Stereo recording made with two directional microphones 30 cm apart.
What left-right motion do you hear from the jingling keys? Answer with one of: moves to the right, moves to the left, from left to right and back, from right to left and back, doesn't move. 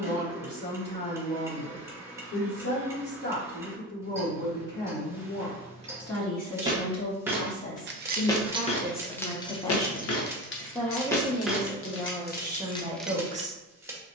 from right to left and back.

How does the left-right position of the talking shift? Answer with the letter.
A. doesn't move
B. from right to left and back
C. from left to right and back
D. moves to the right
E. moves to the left
D.